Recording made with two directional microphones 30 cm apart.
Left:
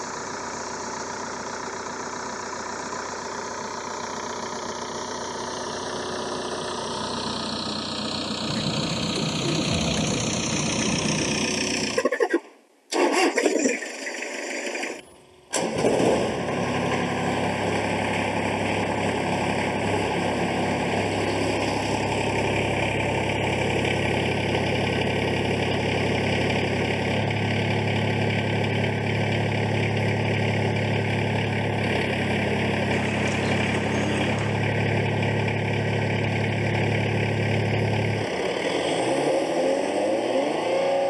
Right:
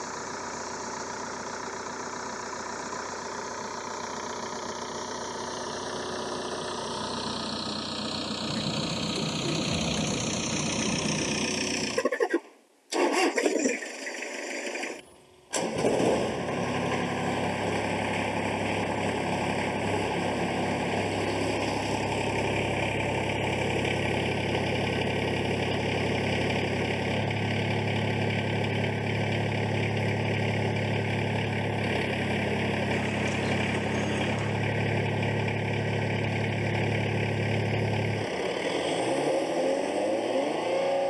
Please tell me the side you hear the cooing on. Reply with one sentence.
You can hear the cooing on the left.